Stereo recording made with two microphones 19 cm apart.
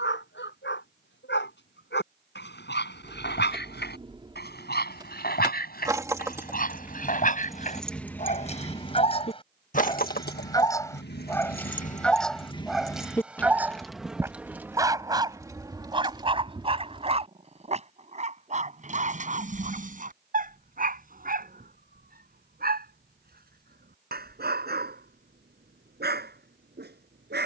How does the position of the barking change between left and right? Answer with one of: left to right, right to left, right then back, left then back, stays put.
left to right.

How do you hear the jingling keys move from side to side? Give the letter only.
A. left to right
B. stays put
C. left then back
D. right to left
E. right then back
C.